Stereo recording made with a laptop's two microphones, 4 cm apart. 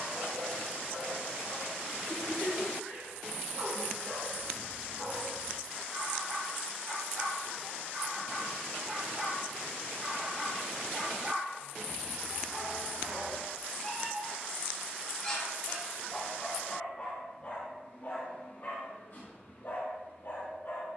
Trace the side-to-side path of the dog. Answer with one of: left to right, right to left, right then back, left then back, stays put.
right to left.